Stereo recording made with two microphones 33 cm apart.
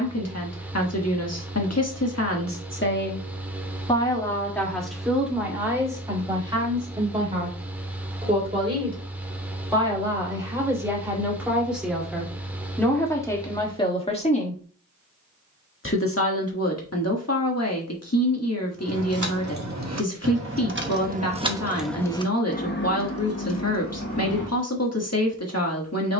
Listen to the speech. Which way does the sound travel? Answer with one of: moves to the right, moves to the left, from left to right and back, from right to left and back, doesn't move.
from left to right and back.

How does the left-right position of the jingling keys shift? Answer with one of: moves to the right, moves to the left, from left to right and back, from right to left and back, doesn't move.
moves to the left.